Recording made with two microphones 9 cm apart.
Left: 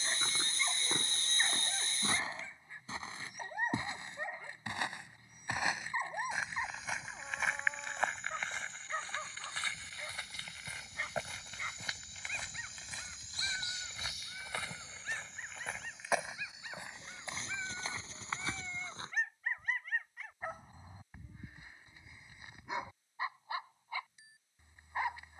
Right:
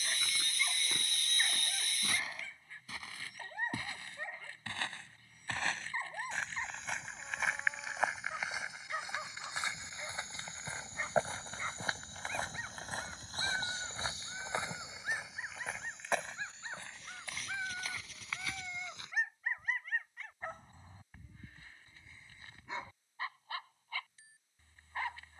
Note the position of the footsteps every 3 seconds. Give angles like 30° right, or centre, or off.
30° left, 20° left, centre, 30° right, 40° right, 10° left, 30° left, off, off.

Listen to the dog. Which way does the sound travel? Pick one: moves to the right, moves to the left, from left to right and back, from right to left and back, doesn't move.
from left to right and back.